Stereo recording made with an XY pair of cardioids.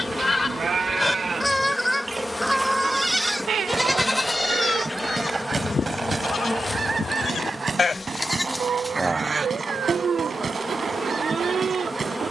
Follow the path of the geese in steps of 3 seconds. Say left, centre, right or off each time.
centre, right, right, right.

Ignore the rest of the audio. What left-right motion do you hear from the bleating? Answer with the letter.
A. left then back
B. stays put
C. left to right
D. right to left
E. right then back
A.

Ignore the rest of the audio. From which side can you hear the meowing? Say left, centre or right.
right.